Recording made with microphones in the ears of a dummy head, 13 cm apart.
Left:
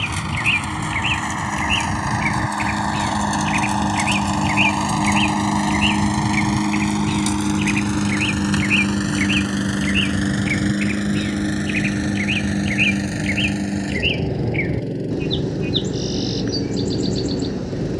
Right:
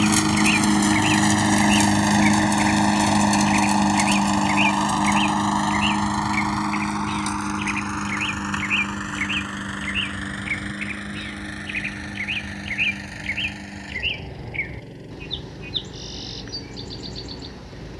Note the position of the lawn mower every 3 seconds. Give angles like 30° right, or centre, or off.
40° right, centre, 30° left, 50° left, 50° left, 60° left.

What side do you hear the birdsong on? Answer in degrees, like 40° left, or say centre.
60° left.